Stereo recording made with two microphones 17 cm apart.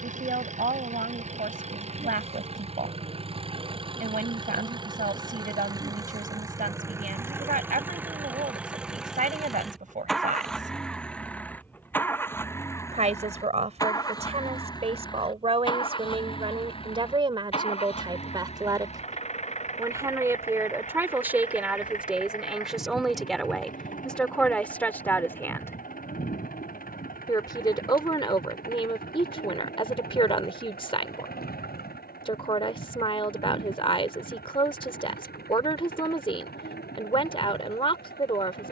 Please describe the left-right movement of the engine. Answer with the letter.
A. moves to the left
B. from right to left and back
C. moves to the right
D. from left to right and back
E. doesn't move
A.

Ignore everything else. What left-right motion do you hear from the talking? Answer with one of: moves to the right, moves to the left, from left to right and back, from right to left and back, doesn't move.
moves to the left.